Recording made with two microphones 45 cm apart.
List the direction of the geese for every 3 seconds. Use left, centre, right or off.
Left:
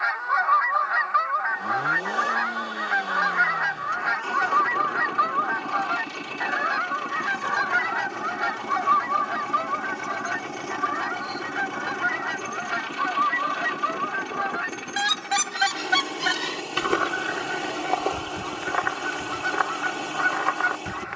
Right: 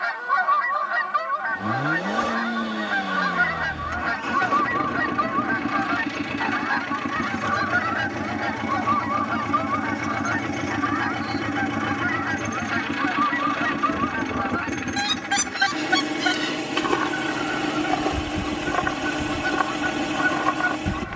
right, right, centre, left, left, centre, right.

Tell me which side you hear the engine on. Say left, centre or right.
right.